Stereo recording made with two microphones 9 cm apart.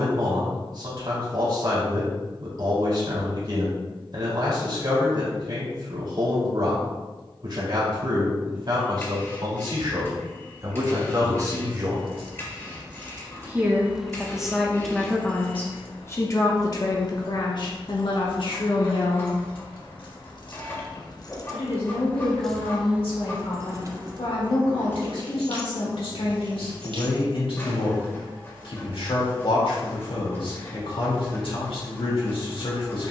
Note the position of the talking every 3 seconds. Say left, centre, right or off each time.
right, right, right, right, centre, left, left, left, left, left, left.